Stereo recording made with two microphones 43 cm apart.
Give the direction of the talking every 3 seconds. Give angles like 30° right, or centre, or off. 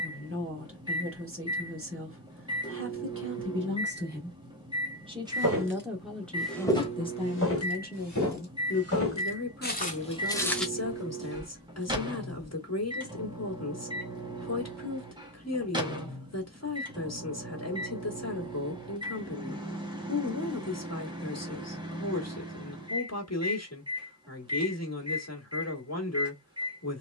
30° right, 20° right, 20° left, 40° left, 40° left, 40° left, 40° left, 40° left, 40° left.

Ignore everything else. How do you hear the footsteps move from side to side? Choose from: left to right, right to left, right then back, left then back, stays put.
left then back.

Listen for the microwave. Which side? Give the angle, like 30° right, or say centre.
10° right.